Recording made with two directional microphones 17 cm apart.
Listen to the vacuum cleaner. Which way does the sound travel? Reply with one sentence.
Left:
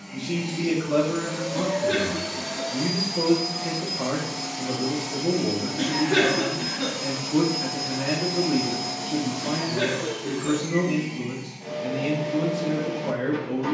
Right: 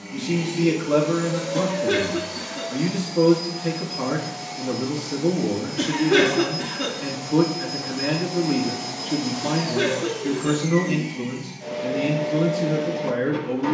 In this clip you hear the vacuum cleaner move from right to left and back again.